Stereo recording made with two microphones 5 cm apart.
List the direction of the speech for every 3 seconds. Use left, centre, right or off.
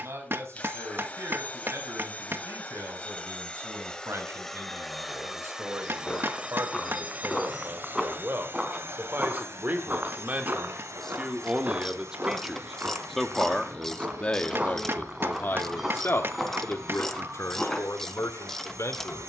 right, right, right, right, centre, left, left.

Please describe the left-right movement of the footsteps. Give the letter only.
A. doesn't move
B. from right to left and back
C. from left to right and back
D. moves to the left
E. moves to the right
C.